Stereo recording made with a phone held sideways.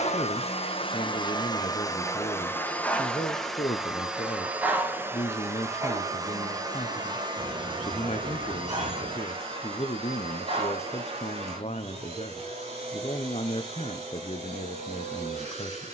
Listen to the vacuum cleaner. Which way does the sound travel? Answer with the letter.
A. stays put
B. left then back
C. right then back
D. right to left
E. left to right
E.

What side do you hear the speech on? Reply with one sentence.
In this clip you hear the speech on the left.